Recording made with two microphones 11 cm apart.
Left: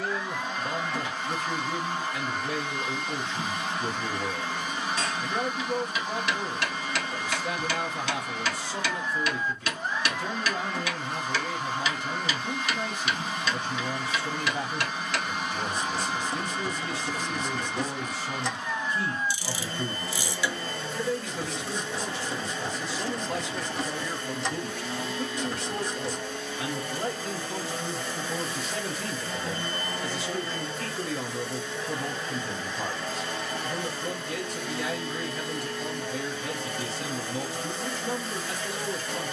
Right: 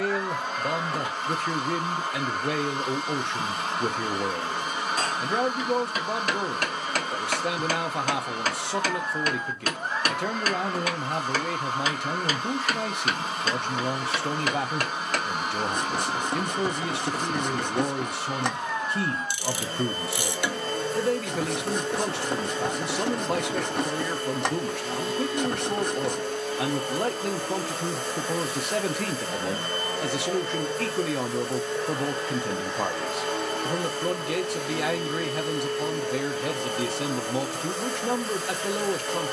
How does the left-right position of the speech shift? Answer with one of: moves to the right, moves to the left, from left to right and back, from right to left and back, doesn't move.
doesn't move.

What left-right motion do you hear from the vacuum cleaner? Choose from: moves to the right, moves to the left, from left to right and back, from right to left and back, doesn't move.
doesn't move.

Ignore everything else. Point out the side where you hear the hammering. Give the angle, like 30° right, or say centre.
50° right.